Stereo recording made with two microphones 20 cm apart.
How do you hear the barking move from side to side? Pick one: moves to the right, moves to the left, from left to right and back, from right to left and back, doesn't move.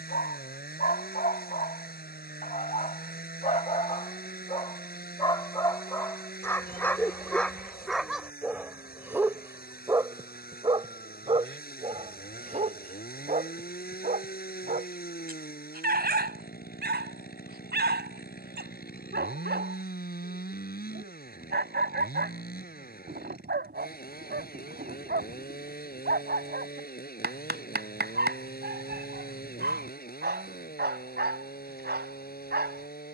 moves to the right.